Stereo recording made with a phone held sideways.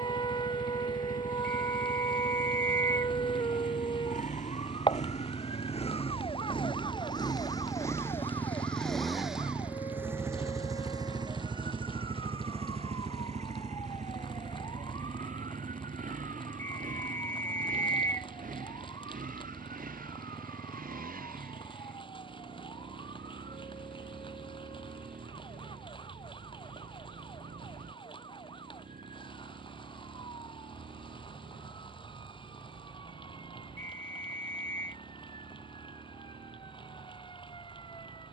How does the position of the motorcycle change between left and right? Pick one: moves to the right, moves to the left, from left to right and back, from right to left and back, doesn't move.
moves to the right.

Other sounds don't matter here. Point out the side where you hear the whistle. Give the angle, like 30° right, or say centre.
60° right.